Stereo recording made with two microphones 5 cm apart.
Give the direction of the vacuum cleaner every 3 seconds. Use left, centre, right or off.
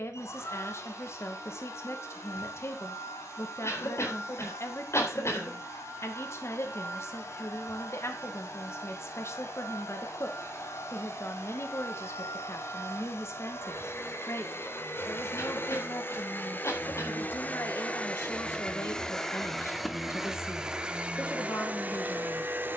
left, left, left, left, left, left, centre, right.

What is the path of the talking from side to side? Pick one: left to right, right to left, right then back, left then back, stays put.
stays put.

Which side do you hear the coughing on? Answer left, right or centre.
left.